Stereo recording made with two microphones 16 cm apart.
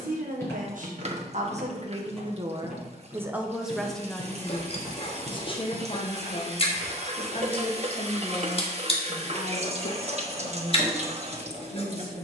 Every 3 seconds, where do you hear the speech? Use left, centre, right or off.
right, centre, left, left.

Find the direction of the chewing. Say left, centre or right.
left.